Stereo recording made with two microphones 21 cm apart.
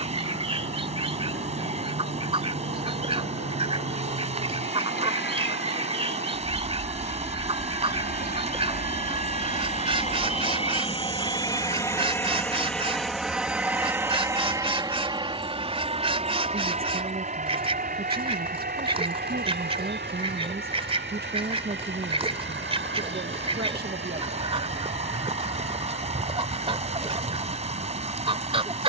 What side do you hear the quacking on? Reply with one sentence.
In this clip you hear the quacking on the right.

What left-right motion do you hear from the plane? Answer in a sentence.
In this clip you hear the plane move to the right.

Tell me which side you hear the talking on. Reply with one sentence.
In this clip you hear the talking on the right.